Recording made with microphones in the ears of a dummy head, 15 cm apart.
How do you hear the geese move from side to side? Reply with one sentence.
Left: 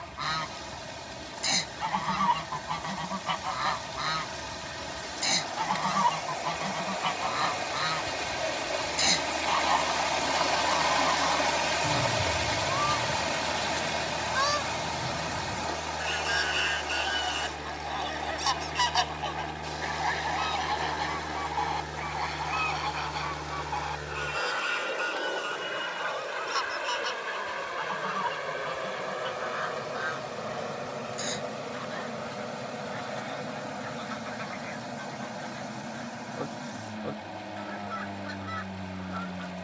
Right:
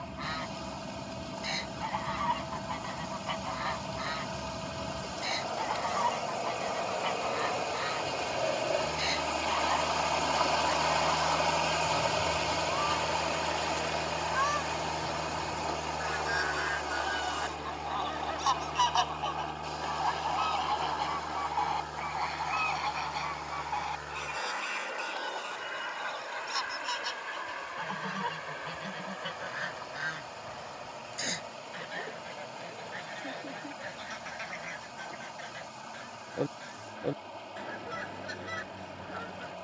In this clip you hear the geese move to the right.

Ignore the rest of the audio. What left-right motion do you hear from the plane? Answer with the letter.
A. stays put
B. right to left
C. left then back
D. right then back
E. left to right
B.